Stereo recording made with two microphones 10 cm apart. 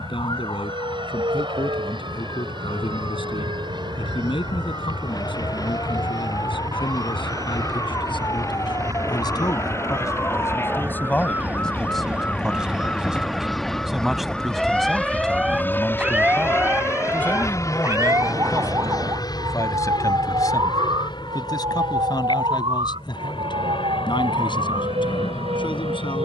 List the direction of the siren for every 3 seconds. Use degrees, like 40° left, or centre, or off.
50° left, 40° left, 40° left, 30° left, 10° left, 20° right, 40° right, 60° right, 70° right.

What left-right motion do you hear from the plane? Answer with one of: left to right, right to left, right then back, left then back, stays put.
right to left.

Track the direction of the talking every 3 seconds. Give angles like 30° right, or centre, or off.
70° left, 70° left, 60° left, 30° left, centre, 10° left, 30° left, 50° left, 60° left.